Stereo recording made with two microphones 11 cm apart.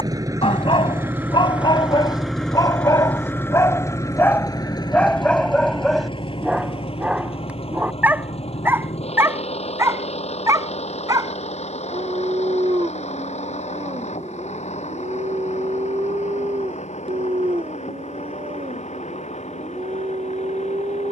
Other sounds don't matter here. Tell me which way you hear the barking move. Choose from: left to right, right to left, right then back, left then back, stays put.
left to right.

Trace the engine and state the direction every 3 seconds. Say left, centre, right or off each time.
centre, left, left, left, left, left, left.